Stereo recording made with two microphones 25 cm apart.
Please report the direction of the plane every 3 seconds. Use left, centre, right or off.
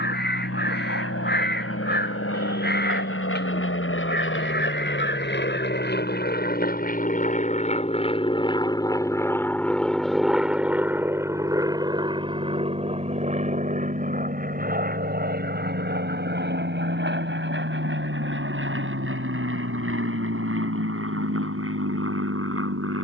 left, left, left, centre, right, right, right, right.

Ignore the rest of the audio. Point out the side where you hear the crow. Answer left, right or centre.
left.